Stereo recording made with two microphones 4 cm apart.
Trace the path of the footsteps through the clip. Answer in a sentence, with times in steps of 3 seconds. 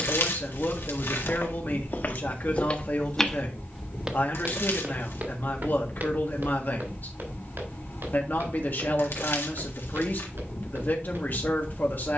You can hear the footsteps on the left from 0 s and on the right from 3 s.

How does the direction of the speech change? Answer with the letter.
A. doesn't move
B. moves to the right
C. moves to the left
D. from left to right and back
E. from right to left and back
A.